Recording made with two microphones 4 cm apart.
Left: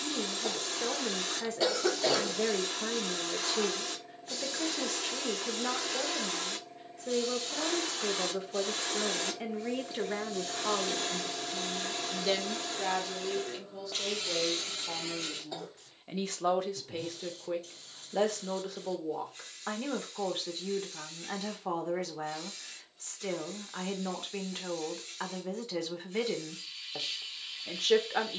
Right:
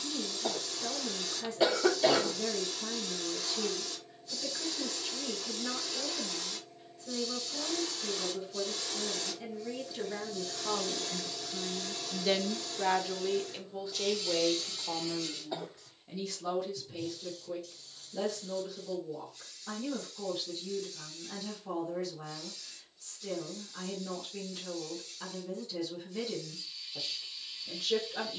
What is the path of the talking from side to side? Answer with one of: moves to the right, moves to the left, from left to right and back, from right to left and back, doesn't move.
from left to right and back.